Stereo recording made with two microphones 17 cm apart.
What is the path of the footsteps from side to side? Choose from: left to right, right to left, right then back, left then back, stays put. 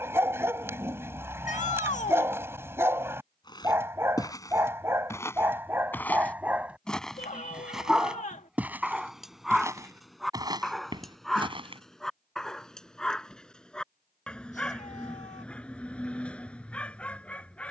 left to right.